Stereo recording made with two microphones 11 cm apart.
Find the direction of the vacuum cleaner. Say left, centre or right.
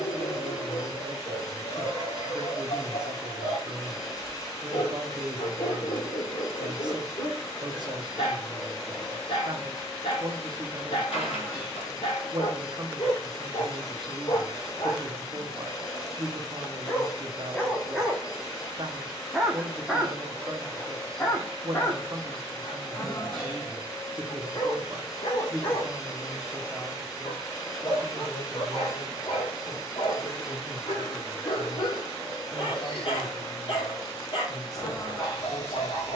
left.